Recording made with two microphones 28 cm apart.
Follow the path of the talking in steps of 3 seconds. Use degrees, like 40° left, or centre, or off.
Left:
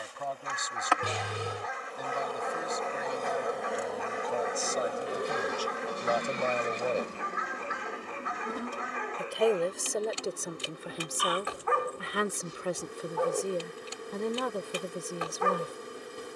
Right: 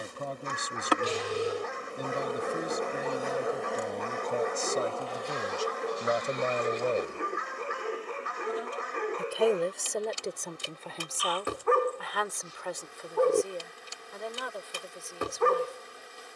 40° right, 30° right, 20° right, 10° left, 40° left, 60° left.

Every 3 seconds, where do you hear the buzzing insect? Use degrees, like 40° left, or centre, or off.
30° right, 10° left, 40° left, 60° left, 60° left, 60° left.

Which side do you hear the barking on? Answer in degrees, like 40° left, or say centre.
50° right.